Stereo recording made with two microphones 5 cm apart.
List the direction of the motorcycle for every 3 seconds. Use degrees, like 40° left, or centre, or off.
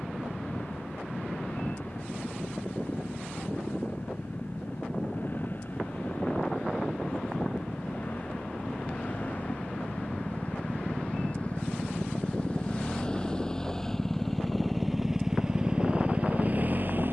50° left, 50° left, 40° left, 40° left, 20° left, 30° right.